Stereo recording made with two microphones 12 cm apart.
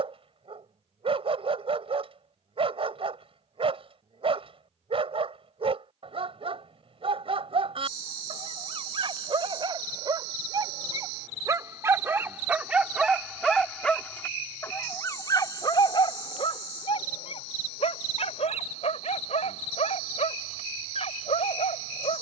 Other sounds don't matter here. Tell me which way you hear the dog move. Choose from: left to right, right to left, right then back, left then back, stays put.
right to left.